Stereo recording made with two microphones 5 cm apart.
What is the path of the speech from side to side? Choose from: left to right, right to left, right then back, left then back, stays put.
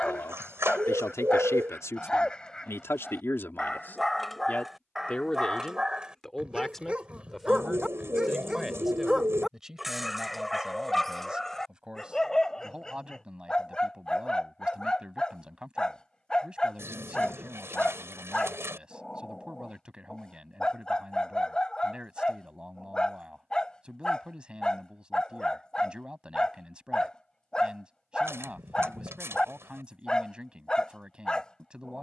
left to right.